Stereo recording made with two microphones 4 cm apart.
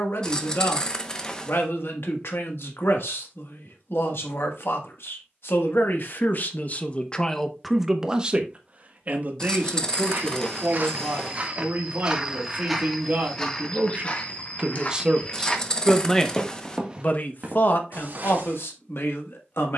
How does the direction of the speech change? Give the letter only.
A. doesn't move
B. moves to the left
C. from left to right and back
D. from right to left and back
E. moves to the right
C.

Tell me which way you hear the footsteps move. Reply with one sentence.
You can hear the footsteps move from right to left and back again.